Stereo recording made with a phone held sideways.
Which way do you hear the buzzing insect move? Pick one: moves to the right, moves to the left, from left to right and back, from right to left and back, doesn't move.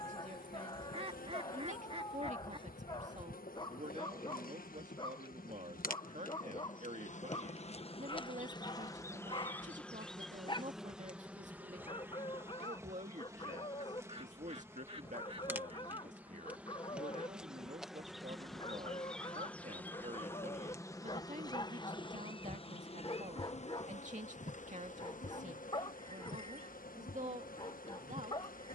from left to right and back.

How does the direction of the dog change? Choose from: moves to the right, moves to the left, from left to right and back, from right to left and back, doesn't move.
doesn't move.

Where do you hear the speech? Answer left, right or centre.
right.